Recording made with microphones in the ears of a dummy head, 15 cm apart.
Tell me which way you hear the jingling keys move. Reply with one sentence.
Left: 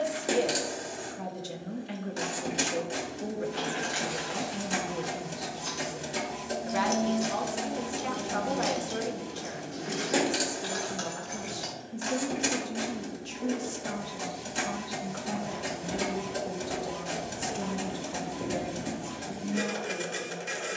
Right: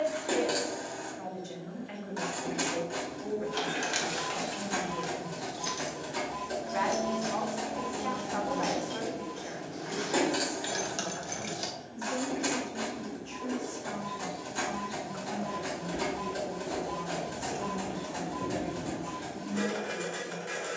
In this clip you hear the jingling keys go left and come back.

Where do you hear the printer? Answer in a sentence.
In this clip you hear the printer on the left.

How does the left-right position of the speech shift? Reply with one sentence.
In this clip you hear the speech stay in one place.